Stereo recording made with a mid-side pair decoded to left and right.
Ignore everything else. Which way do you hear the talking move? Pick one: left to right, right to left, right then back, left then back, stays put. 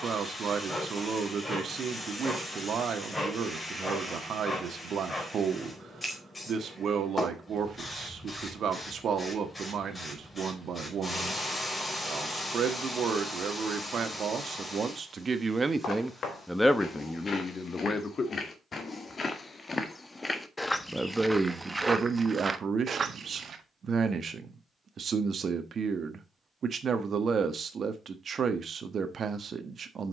left then back.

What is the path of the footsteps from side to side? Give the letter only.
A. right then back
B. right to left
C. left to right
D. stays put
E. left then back
C.